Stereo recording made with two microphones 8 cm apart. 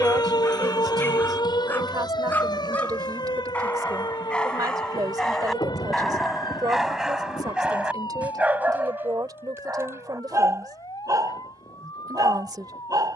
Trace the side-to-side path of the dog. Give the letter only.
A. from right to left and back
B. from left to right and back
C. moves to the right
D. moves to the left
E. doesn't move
C.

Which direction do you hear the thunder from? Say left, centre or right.
left.